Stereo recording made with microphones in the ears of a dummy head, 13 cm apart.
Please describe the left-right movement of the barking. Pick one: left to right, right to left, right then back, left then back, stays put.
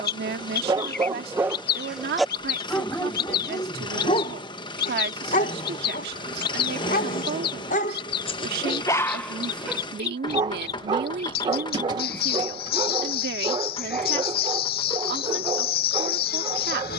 left then back.